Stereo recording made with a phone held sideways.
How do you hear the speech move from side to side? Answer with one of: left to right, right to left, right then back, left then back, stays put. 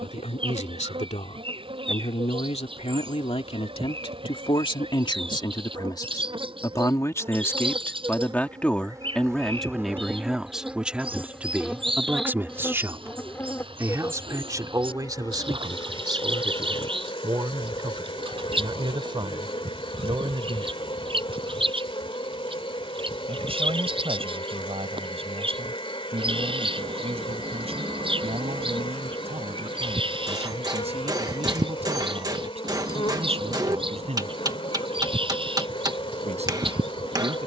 left to right.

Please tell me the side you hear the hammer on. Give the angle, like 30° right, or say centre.
30° right.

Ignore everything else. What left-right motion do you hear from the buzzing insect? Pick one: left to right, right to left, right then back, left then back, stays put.
right to left.